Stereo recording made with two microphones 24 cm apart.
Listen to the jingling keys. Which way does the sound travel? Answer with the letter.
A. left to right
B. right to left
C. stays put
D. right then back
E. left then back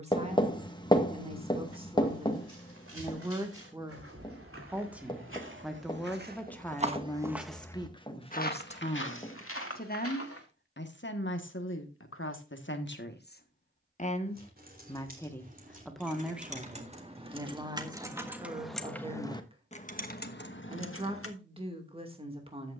B.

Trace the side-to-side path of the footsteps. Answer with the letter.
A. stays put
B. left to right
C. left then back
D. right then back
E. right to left
E.